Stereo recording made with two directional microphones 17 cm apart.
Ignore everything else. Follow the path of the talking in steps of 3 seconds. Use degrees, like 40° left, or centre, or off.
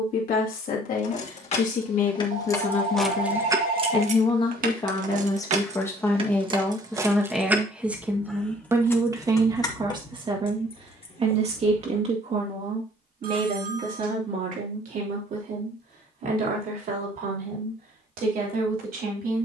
50° left, 30° left, centre, 30° right, 50° right, 60° right, 60° right.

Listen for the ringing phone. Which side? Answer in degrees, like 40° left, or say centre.
60° right.